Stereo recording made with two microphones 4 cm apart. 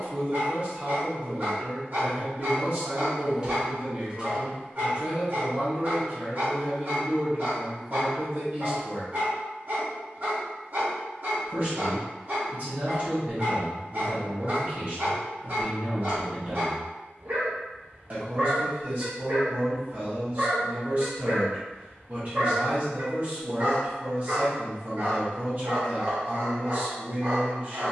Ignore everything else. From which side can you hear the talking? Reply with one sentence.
In this clip you hear the talking on the right.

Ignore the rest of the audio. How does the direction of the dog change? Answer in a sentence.
In this clip you hear the dog stay in one place.